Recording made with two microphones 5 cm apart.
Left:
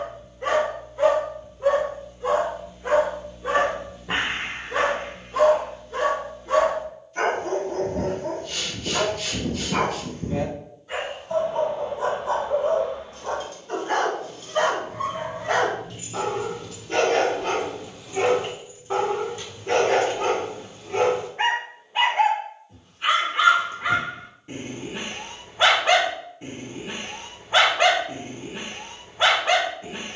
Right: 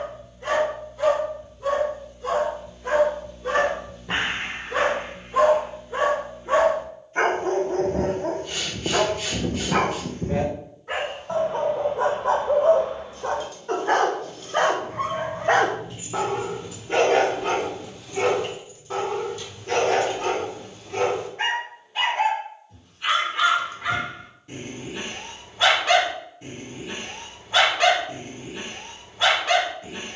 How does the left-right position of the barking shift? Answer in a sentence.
You can hear the barking move from left to right and back again.